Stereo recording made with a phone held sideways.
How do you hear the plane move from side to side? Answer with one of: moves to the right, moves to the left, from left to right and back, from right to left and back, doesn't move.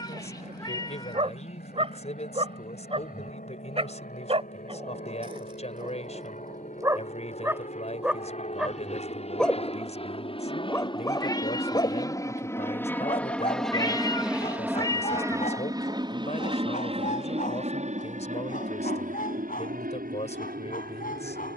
moves to the right.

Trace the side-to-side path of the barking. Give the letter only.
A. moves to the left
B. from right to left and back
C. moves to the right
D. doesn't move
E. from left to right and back
A.